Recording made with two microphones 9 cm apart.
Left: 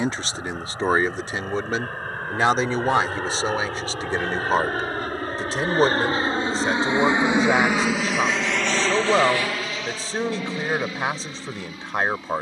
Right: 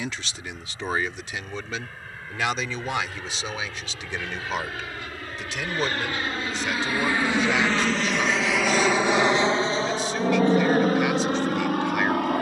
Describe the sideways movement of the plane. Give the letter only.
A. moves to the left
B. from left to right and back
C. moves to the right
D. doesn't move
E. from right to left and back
C.